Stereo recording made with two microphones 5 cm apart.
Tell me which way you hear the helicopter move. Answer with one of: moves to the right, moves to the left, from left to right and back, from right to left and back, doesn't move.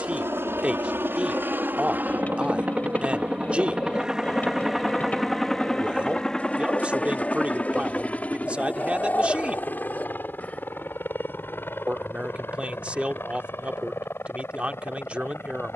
moves to the left.